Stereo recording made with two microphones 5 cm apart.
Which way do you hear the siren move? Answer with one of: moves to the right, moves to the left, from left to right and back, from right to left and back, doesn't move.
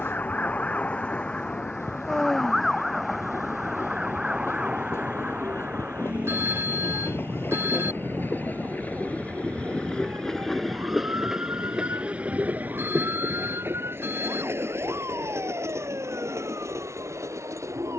moves to the right.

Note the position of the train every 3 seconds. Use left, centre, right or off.
left, left, left, centre, right, right.